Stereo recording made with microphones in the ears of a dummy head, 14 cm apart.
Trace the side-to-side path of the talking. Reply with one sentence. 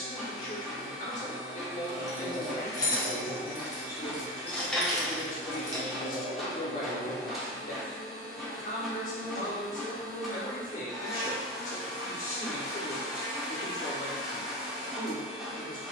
You can hear the talking stay in one place.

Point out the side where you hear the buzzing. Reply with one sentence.
In this clip you hear the buzzing in the centre.